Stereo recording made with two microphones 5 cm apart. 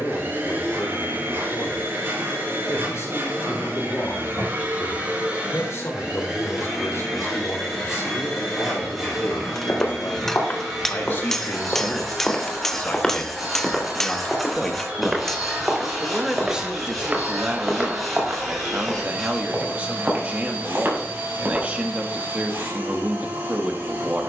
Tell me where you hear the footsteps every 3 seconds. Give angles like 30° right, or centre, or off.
off, off, off, 40° left, 10° left, 20° right, 40° right, 40° right.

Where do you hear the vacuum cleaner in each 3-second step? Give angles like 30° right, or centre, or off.
50° right, 40° right, centre, centre, 20° right, 30° right, 40° right, 40° right.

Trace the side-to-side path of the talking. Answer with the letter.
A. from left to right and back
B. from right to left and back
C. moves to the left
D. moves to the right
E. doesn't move
D.